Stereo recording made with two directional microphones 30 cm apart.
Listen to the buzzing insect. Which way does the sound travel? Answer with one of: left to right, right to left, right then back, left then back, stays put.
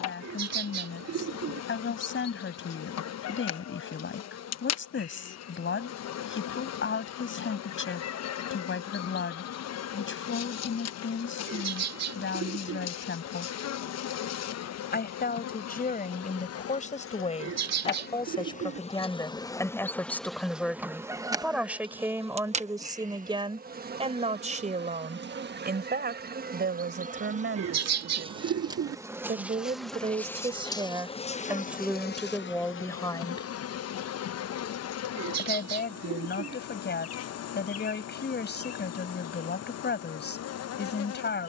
right then back.